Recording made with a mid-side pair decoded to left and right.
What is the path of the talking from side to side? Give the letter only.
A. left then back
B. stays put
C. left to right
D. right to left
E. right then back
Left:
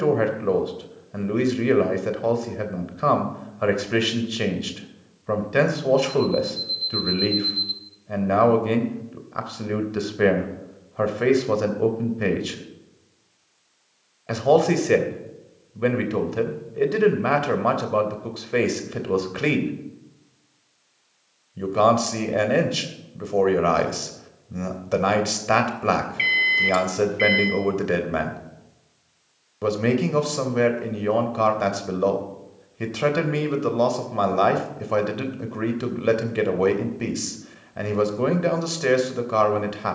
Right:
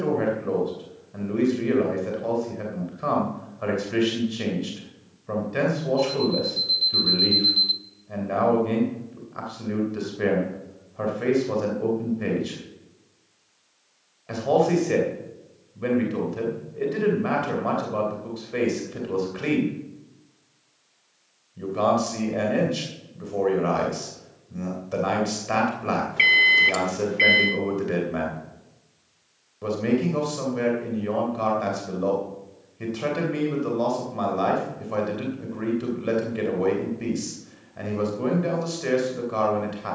B.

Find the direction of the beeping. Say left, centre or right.
right.